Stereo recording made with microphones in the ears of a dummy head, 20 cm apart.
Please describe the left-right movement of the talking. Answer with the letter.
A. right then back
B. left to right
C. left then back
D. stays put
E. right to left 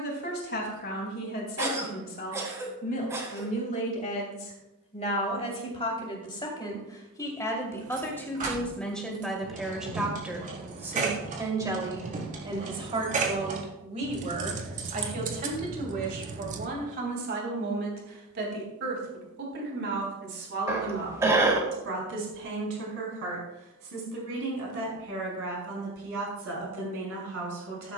B.